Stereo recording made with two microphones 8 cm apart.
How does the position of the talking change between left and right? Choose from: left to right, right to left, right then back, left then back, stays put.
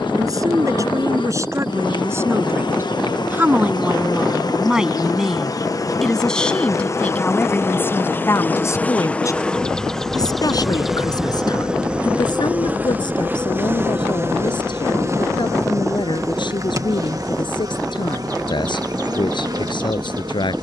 right to left.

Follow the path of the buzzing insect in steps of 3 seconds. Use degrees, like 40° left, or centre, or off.
70° left, 50° left, 30° left, centre, 20° right, 40° right, 50° right.